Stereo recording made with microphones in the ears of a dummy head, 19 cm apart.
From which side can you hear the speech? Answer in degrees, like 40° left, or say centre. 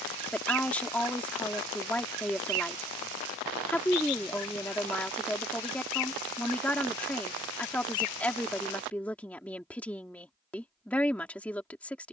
10° left.